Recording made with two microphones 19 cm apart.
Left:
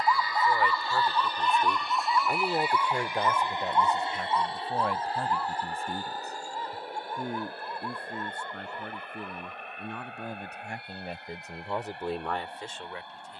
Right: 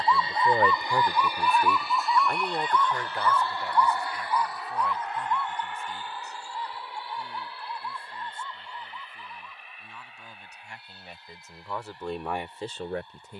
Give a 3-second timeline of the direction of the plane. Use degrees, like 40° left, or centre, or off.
10° right, 20° left, 40° left, 50° left, 60° left.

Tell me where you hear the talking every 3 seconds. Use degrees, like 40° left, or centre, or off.
20° right, 50° left, 60° left, 50° left, 30° right.